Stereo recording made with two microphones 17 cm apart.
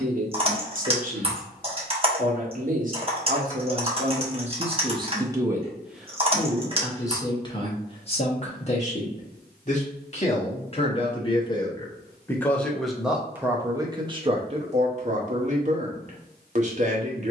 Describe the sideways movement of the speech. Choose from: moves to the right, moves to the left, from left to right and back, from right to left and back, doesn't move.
from right to left and back.